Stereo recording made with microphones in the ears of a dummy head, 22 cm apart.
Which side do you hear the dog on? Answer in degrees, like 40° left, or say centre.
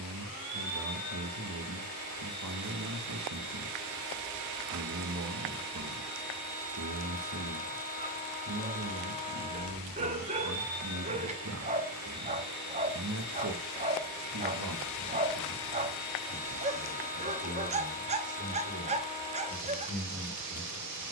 30° right.